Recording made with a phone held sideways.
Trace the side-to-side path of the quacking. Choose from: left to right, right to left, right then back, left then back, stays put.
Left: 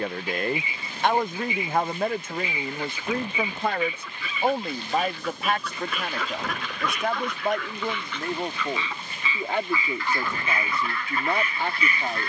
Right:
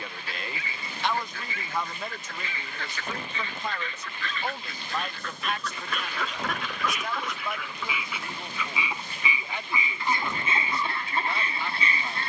left to right.